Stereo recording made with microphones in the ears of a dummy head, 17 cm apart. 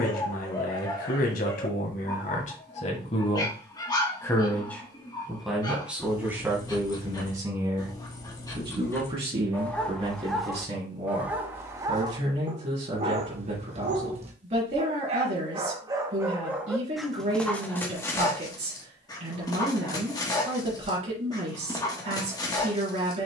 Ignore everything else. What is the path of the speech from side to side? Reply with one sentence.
You can hear the speech move from left to right.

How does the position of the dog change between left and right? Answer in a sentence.
In this clip you hear the dog go right and come back.